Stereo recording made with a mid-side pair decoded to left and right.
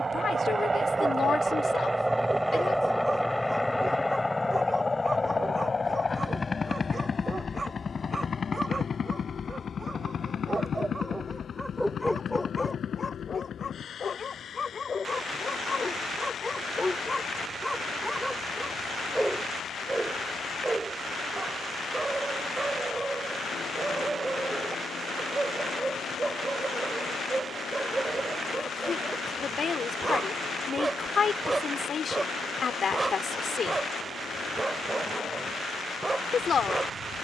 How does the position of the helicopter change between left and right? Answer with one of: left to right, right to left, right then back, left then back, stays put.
right to left.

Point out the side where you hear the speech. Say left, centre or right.
left.